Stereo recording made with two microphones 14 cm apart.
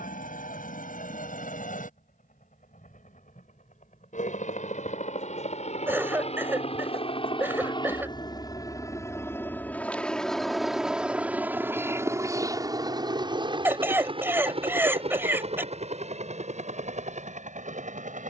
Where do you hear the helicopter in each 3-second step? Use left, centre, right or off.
left, left, left, centre, right, right.